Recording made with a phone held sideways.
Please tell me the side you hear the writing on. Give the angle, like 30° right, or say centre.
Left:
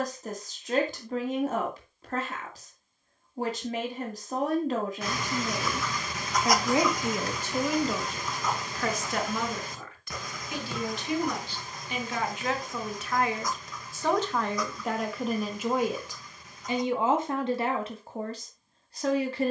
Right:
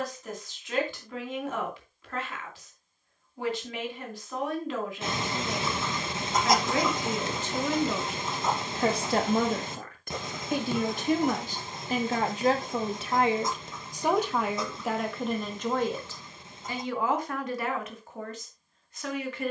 30° right.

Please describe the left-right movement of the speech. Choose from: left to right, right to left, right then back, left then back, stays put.
right then back.